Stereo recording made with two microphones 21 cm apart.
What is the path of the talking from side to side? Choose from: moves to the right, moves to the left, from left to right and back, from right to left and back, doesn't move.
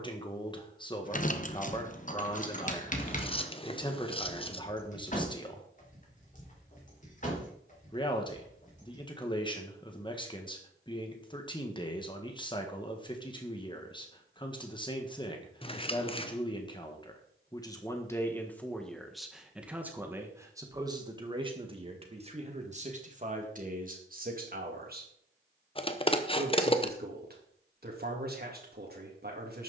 moves to the right.